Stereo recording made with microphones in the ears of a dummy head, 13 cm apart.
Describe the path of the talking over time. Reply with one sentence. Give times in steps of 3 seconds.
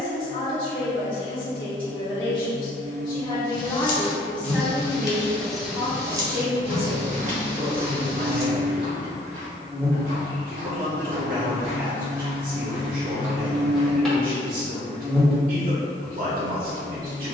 You can hear the talking on the left from 0 s, in the centre from 3 s and on the right from 6 s.